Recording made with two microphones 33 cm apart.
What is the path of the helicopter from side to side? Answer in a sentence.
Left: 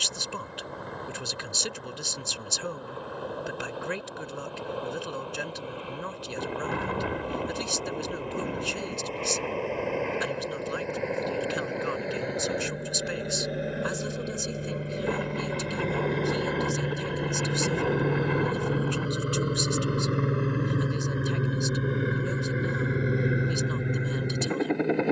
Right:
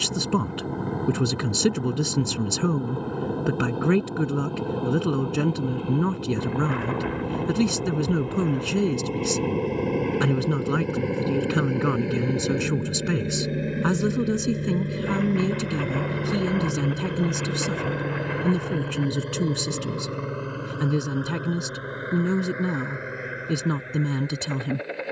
In this clip you hear the helicopter move to the left.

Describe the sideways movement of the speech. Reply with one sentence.
In this clip you hear the speech stay put.